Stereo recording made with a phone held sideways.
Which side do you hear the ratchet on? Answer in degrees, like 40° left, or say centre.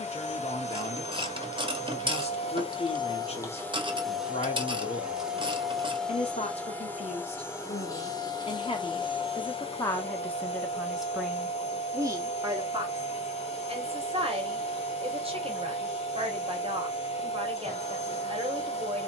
30° right.